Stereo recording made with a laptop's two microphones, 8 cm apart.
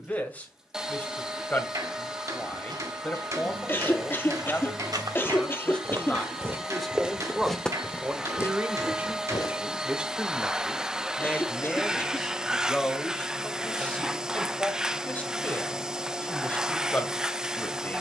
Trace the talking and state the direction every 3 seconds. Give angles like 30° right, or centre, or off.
20° left, 20° left, 10° right, 10° right, 10° left, 20° left.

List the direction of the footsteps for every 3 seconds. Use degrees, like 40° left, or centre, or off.
70° right, 60° right, centre, 50° left, off, off.